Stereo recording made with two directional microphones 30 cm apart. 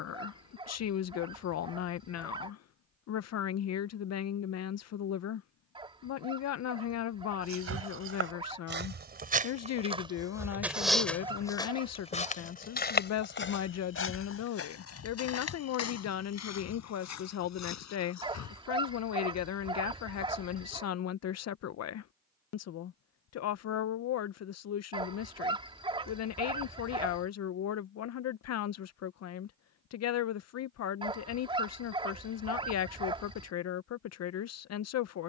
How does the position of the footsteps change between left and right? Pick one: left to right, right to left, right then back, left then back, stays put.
right to left.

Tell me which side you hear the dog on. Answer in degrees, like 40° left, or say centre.
20° right.